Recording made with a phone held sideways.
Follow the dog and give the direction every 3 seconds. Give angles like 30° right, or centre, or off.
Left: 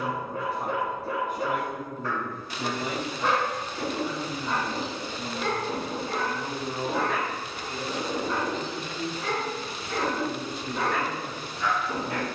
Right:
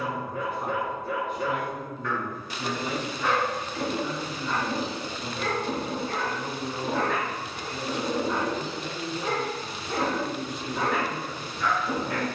30° left, 30° left, centre, 10° right.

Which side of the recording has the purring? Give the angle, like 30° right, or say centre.
40° right.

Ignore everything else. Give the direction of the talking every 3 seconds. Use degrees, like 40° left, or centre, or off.
50° left, 30° left, centre, 30° left.